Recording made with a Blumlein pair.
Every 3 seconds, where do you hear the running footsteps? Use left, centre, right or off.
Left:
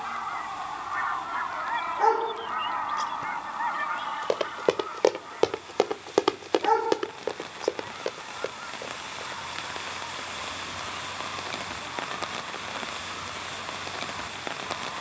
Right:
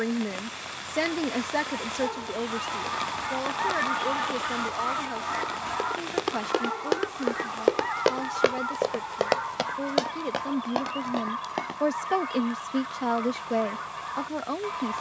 off, left, centre, right, off.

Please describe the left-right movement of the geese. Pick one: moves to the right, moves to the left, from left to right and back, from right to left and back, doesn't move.
moves to the right.